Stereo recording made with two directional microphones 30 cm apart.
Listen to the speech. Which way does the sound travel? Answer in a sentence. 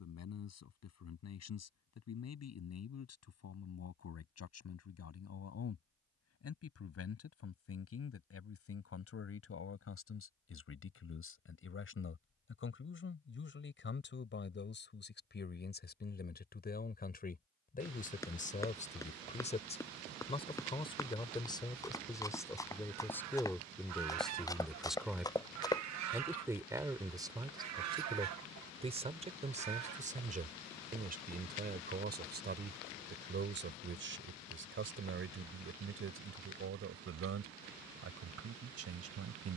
In this clip you hear the speech move from left to right.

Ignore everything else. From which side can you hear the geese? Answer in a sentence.
You can hear the geese on the right.